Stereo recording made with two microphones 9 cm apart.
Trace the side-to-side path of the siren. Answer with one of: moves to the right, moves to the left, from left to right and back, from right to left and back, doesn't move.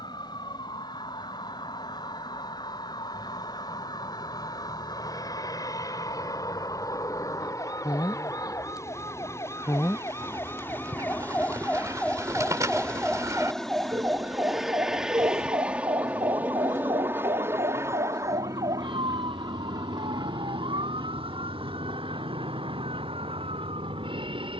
moves to the right.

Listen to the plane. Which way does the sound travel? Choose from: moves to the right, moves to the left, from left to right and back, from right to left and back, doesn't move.
moves to the right.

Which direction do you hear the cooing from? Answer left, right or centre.
right.